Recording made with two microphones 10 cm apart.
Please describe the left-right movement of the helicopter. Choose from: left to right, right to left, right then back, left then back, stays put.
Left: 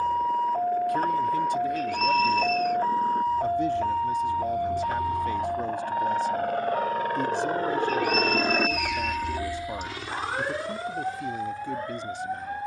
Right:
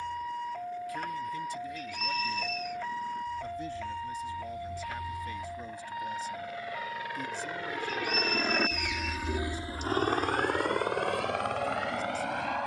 left to right.